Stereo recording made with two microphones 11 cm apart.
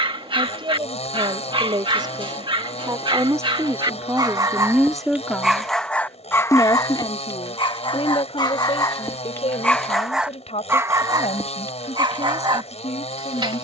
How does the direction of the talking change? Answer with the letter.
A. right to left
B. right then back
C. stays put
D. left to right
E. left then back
A.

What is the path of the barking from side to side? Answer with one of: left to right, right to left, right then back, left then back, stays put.
left then back.